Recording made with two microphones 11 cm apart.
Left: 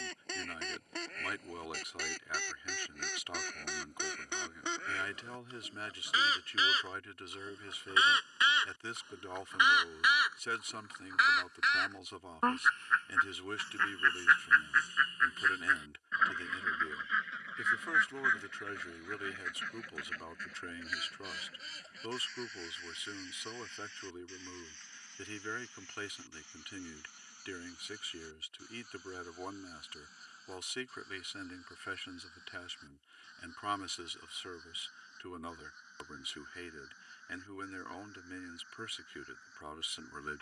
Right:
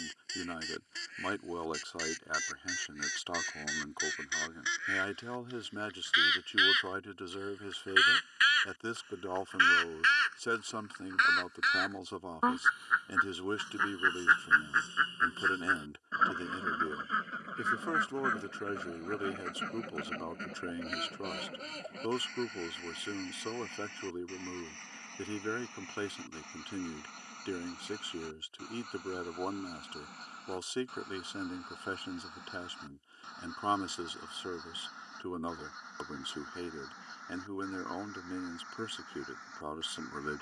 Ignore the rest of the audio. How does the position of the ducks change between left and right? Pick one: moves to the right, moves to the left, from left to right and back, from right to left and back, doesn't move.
moves to the right.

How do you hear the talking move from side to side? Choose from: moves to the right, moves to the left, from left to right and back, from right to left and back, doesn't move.
doesn't move.